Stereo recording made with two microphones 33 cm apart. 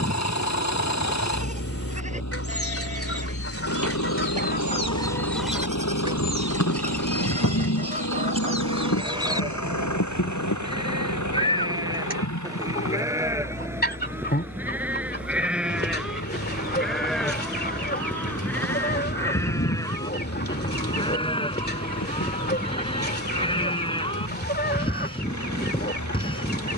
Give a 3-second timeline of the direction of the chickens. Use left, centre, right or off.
left, left, right, centre, left, left, left, left, left.